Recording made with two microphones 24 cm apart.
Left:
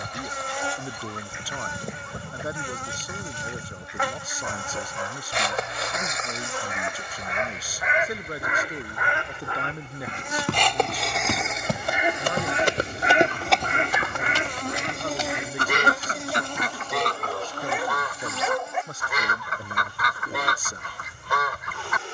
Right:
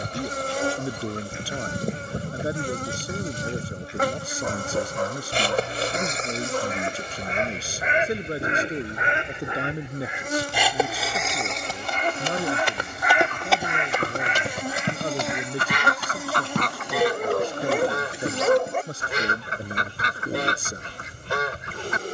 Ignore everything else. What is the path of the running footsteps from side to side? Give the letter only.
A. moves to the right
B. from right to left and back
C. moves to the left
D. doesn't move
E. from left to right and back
A.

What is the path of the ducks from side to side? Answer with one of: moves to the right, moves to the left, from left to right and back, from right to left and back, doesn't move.
from right to left and back.